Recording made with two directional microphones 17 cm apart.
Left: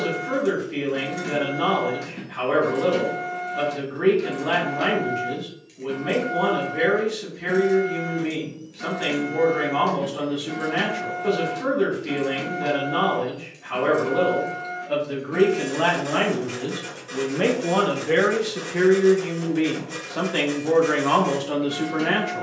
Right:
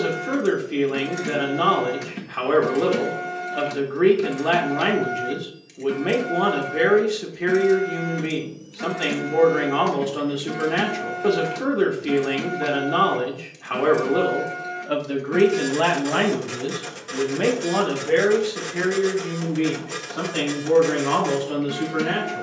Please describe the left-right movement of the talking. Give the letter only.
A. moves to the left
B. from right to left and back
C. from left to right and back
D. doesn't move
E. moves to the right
A.